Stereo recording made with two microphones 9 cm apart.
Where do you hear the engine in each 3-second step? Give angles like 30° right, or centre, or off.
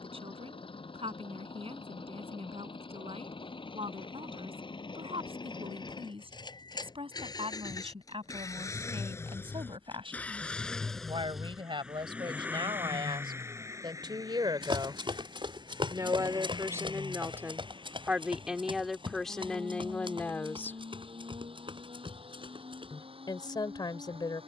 70° left, 60° left, 40° left, 10° left, 30° right, 50° right, 60° right, 70° right.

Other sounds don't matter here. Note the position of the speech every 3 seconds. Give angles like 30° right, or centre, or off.
80° right, 80° right, 70° right, 70° right, 50° right, 30° right, 10° left, 50° left.